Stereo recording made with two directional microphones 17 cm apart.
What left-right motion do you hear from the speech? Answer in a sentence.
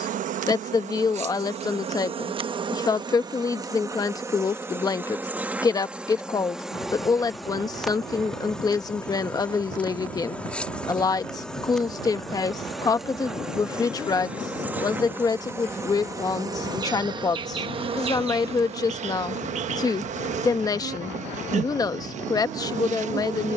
In this clip you hear the speech stay put.